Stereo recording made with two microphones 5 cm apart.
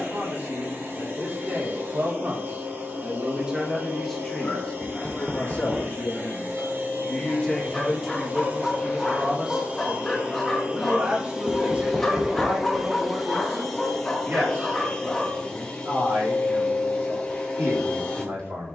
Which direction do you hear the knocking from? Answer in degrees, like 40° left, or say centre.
20° right.